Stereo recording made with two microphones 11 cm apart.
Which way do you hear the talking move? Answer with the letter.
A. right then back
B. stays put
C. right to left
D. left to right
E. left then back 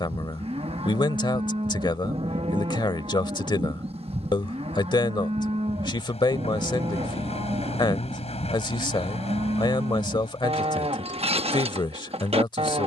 B.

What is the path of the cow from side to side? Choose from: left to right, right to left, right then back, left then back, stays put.
stays put.